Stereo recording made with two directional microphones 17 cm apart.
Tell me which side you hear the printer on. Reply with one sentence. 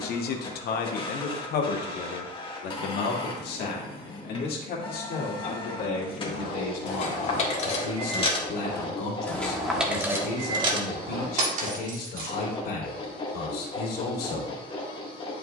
In this clip you hear the printer on the left.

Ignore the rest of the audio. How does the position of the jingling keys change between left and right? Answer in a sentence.
In this clip you hear the jingling keys go from the left side to the right.